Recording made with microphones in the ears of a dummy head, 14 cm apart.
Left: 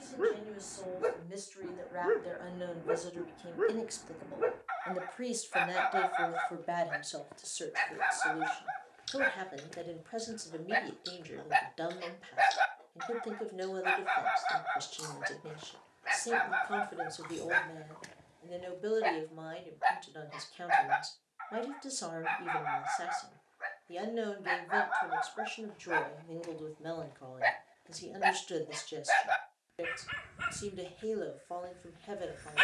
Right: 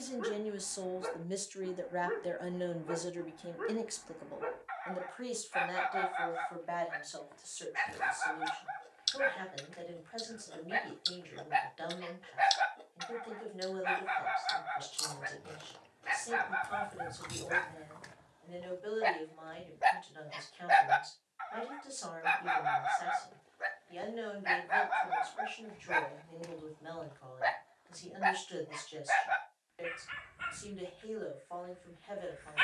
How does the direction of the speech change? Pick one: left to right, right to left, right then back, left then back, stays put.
right to left.